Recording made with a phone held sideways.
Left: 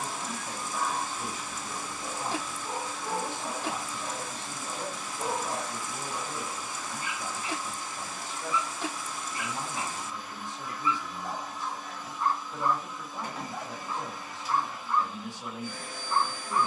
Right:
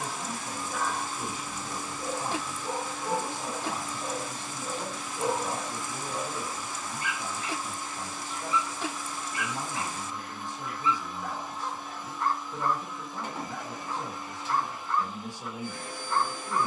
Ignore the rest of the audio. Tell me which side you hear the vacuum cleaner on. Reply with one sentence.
You can hear the vacuum cleaner on the right.